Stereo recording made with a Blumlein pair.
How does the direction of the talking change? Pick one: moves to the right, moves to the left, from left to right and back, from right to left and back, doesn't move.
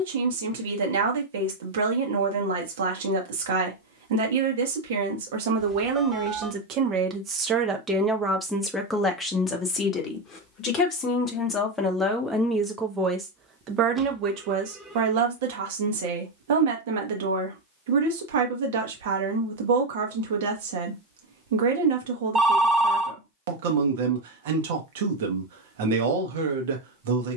from right to left and back.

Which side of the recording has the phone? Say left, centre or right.
centre.